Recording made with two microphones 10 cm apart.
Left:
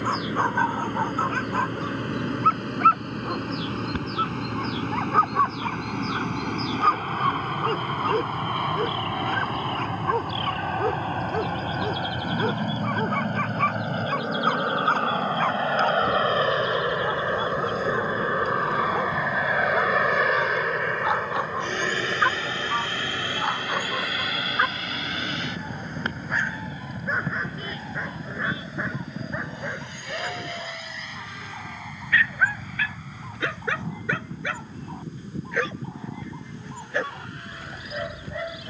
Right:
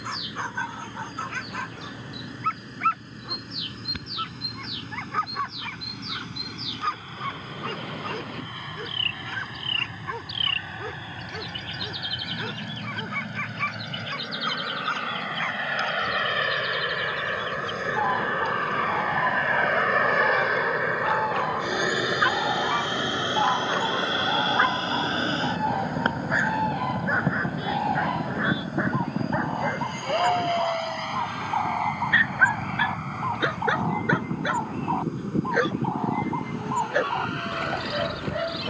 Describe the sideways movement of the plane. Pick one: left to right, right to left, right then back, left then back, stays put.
left to right.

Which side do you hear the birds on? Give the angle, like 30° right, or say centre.
70° right.